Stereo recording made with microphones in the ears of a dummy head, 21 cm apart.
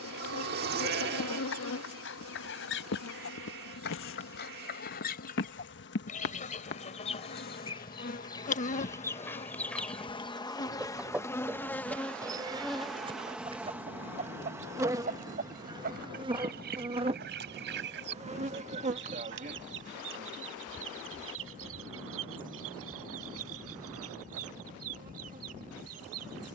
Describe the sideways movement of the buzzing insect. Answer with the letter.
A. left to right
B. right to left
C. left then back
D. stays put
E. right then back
A.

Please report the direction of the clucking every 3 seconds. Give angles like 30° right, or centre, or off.
50° left, 40° left, 20° left, centre, 20° right, 40° right, 50° right, 60° right, 60° right.